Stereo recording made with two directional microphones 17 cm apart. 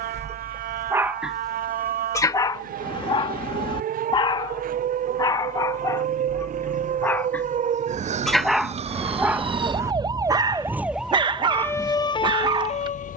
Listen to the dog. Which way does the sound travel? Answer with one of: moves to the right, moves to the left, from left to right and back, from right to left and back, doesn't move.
from right to left and back.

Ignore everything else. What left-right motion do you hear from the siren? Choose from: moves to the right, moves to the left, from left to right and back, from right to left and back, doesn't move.
moves to the left.